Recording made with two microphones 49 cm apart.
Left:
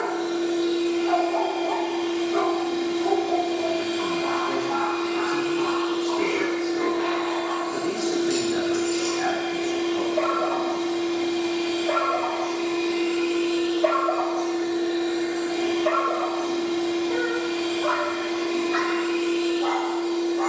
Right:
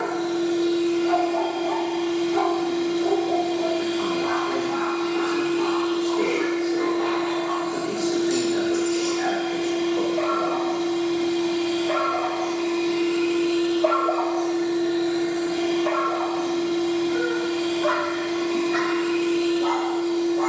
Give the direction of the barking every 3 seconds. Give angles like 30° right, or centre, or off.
30° right, 50° left, 80° left, 70° left, 40° left, 20° right, 50° right.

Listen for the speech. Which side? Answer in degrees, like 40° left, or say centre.
30° left.